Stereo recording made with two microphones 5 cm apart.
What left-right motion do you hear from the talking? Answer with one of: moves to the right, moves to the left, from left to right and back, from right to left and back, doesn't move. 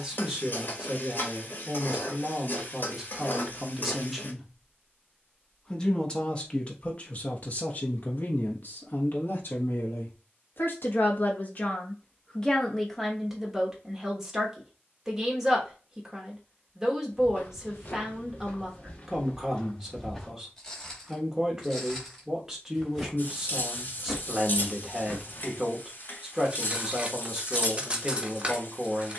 from right to left and back.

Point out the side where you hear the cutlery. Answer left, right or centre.
right.